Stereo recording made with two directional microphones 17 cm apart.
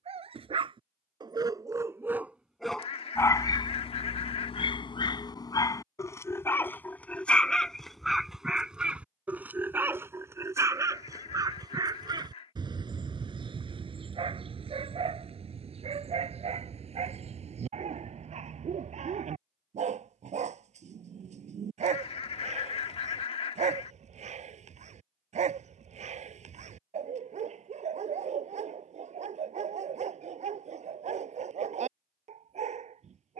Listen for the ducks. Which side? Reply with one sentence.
In this clip you hear the ducks on the left.